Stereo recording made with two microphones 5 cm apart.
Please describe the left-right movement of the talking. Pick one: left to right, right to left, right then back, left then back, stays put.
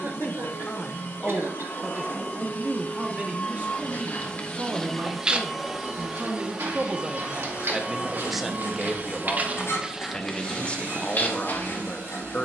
right then back.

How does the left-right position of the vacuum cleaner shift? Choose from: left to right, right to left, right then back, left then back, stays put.
left to right.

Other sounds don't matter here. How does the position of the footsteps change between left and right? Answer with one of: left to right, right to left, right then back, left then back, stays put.
right then back.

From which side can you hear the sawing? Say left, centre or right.
left.